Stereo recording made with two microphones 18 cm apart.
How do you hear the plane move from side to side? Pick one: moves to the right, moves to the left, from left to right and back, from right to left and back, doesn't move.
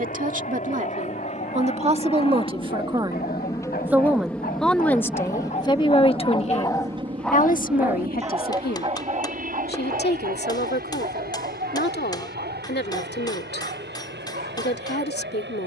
moves to the right.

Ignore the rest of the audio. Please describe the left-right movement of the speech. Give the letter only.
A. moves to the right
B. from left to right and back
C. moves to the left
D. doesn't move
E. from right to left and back
C.